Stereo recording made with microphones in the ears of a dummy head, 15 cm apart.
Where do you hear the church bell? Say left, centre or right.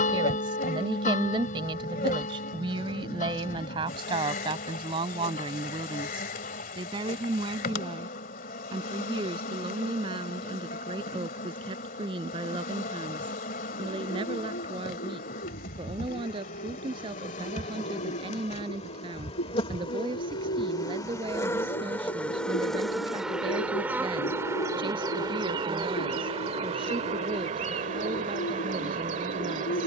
left.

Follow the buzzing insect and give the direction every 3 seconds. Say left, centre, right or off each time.
left, left, left, left, left, left, left, centre, right, right.